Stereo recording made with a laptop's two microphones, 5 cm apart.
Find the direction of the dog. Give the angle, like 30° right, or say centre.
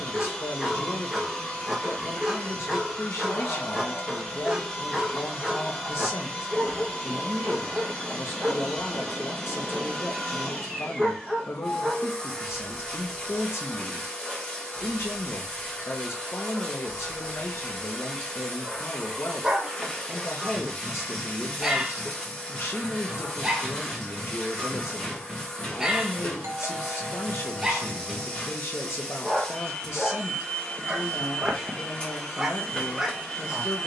10° right.